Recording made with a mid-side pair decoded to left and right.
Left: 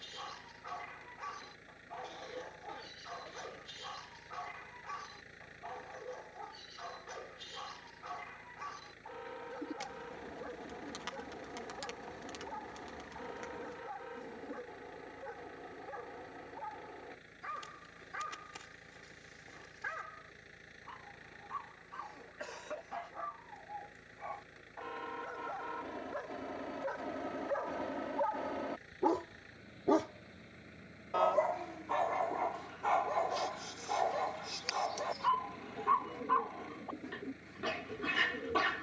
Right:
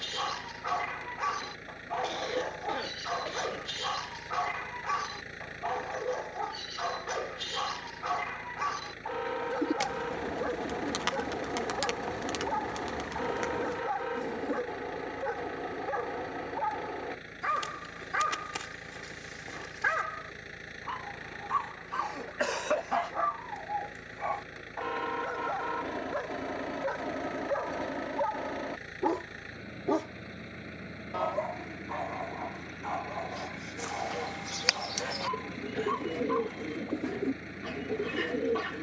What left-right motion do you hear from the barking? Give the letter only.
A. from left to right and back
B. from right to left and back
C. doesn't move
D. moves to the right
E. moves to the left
E.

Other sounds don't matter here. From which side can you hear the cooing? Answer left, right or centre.
right.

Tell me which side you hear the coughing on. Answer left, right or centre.
right.